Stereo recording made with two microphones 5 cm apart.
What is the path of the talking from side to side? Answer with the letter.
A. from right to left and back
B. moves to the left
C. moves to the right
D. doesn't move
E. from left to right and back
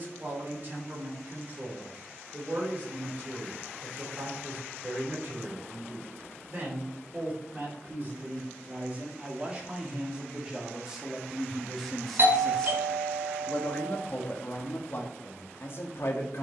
B.